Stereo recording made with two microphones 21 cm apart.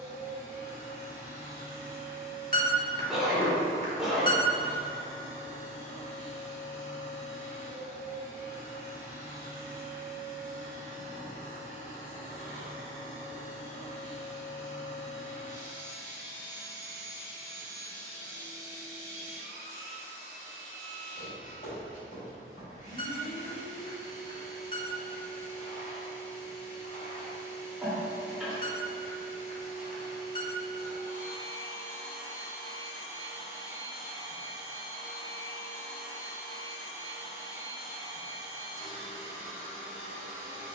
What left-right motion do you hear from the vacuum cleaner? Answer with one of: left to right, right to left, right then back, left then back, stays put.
stays put.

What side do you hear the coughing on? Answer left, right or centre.
centre.